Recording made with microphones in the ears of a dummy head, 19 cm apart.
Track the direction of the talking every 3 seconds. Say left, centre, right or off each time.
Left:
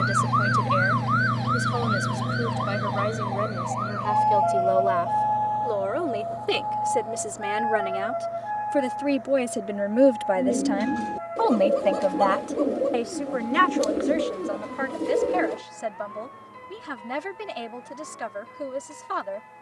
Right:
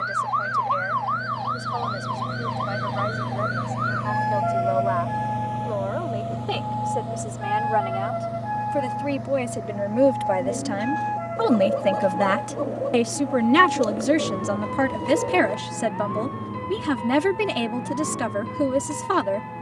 left, left, left, centre, right, right, right.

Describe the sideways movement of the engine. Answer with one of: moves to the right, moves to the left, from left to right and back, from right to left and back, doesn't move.
moves to the right.